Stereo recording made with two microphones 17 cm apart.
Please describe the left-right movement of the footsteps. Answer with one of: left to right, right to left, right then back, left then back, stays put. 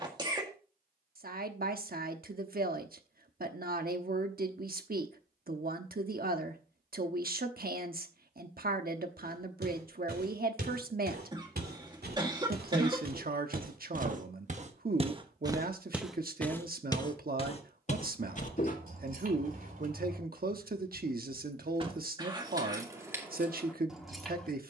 right to left.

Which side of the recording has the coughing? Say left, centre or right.
right.